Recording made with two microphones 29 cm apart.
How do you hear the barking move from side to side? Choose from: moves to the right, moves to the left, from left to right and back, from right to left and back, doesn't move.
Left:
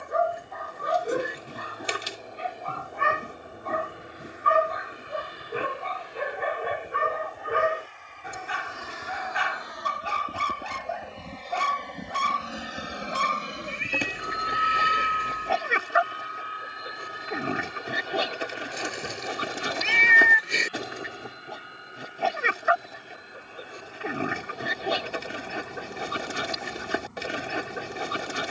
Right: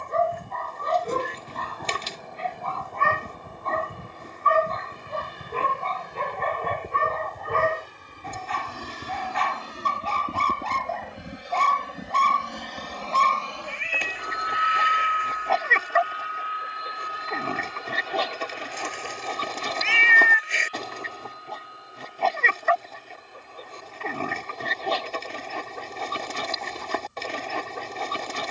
doesn't move.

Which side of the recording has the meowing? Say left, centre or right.
left.